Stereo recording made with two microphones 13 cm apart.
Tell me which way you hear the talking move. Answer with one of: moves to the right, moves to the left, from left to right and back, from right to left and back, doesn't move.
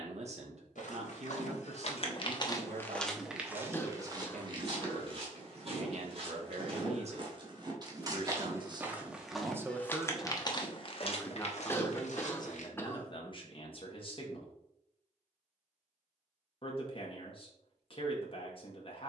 moves to the left.